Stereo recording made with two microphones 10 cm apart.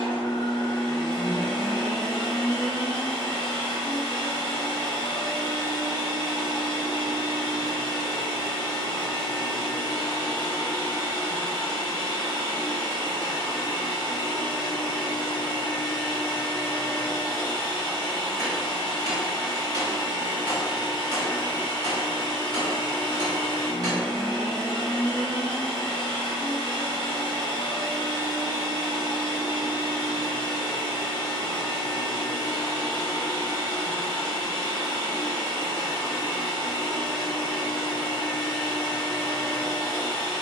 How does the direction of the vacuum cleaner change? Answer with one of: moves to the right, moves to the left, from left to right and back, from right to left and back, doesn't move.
doesn't move.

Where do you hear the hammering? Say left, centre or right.
right.